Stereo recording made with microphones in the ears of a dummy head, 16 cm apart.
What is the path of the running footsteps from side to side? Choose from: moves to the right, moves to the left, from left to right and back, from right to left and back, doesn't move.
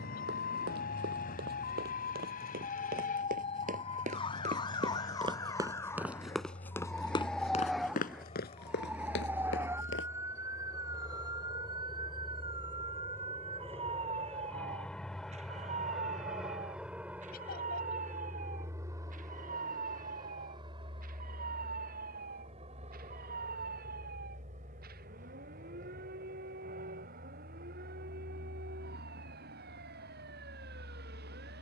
moves to the left.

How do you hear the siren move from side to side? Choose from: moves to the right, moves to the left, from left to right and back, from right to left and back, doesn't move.
moves to the right.